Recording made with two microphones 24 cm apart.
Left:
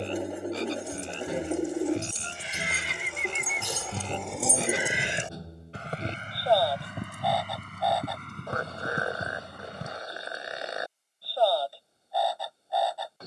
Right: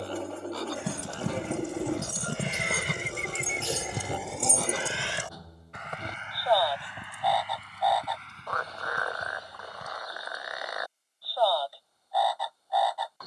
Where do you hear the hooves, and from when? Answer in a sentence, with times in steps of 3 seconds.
You can hear the hooves on the right from 0 s, in the centre from 3 s, on the left from 6 s and not at all from 12 s.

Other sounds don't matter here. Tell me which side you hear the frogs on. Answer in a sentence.
In this clip you hear the frogs on the left.